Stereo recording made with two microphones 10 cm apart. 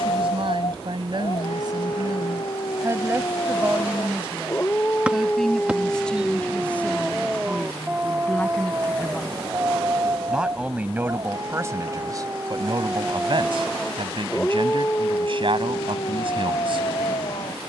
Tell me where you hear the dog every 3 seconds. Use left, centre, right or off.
left, left, centre, right, centre, left.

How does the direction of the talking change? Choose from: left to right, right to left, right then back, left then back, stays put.
left then back.